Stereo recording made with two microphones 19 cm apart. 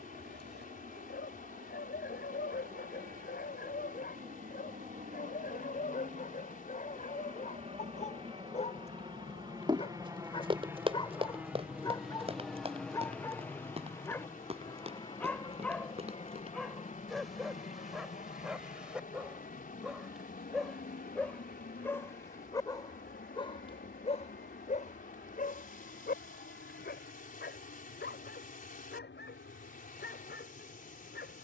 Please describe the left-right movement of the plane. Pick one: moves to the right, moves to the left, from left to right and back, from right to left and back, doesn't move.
moves to the left.